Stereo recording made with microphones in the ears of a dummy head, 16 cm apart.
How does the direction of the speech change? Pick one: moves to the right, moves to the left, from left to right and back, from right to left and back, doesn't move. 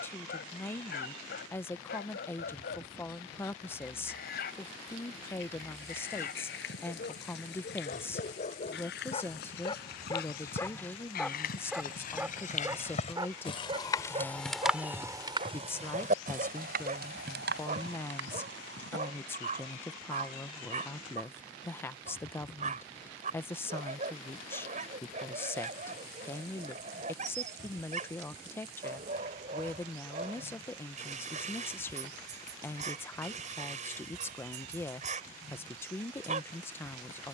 doesn't move.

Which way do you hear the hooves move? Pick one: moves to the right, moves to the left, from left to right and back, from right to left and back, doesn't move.
moves to the right.